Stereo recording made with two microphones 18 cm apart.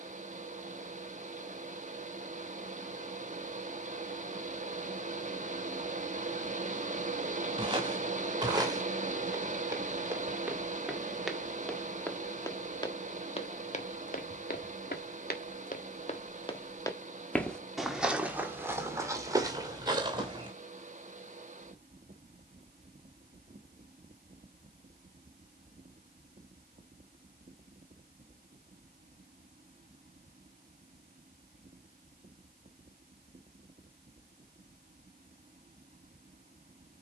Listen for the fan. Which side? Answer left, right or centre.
right.